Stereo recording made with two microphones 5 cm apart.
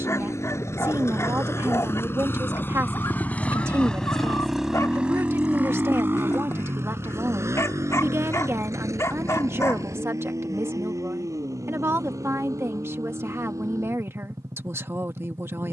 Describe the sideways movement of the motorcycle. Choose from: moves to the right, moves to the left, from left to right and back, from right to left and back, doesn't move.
moves to the right.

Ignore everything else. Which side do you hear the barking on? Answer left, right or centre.
left.